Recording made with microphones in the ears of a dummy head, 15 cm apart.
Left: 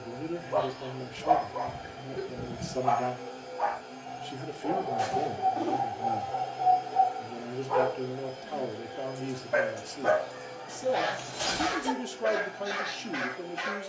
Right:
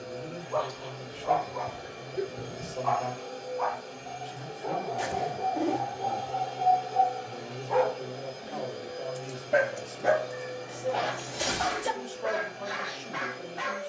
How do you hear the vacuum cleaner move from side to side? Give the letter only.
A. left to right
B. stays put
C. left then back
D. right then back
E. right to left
B.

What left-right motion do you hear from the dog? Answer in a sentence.
You can hear the dog go right and come back.